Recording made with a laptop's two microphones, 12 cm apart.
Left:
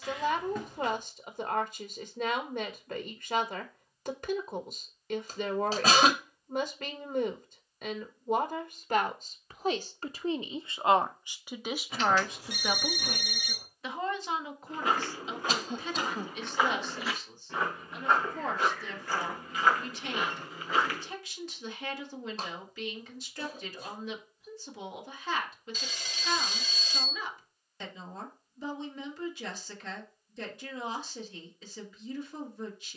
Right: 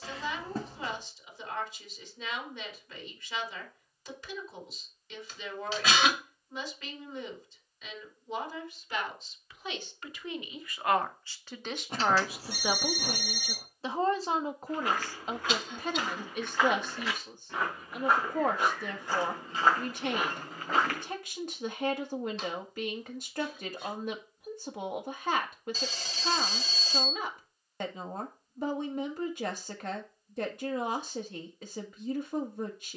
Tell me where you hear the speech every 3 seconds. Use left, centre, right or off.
left, left, left, left, right, right, right, right, right, right, right.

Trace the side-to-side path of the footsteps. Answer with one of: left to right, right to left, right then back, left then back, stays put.
left to right.